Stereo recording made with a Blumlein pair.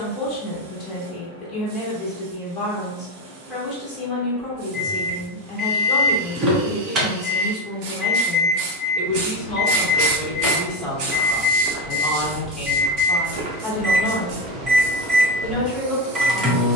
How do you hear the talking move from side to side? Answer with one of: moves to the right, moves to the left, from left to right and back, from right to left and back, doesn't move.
doesn't move.